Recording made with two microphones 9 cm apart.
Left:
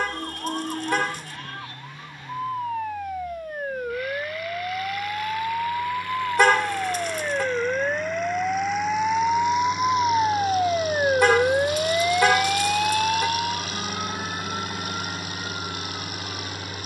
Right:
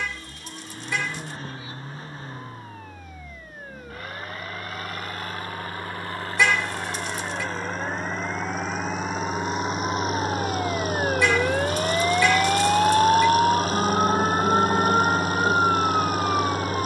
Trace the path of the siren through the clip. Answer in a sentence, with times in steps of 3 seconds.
You can hear the siren on the left from 0 s and on the right from 12 s.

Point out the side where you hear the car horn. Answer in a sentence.
In this clip you hear the car horn on the left.